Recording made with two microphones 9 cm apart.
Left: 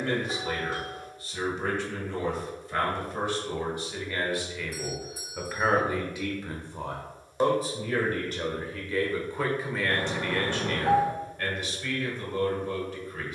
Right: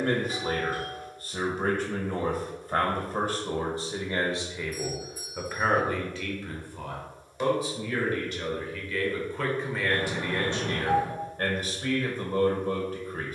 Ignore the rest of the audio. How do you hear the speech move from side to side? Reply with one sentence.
You can hear the speech go left and come back.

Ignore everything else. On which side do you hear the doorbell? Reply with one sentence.
In this clip you hear the doorbell on the left.